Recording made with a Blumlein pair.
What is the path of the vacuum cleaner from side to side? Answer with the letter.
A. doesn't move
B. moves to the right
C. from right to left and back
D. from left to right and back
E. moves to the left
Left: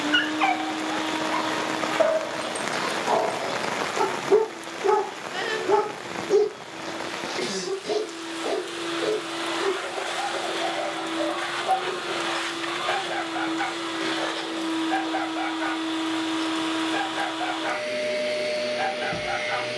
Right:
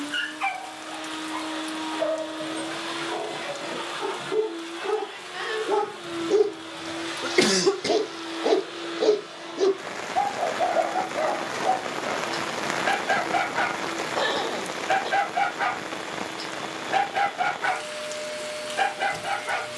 D.